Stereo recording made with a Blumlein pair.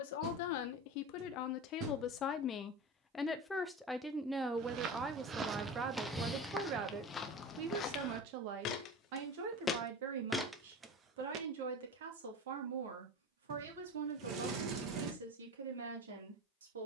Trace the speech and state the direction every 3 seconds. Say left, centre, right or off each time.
left, centre, right, right, right, right.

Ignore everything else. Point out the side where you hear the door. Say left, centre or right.
right.